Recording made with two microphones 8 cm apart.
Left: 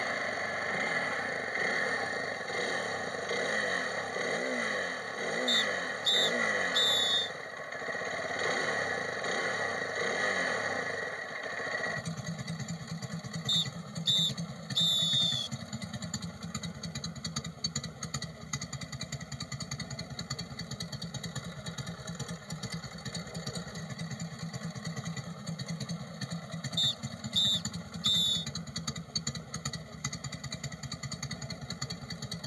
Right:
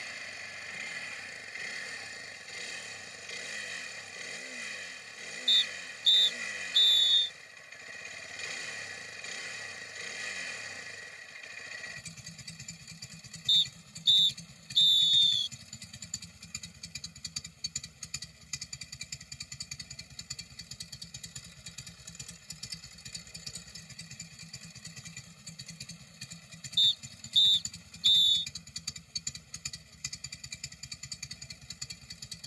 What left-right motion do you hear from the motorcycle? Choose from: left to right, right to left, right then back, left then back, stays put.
stays put.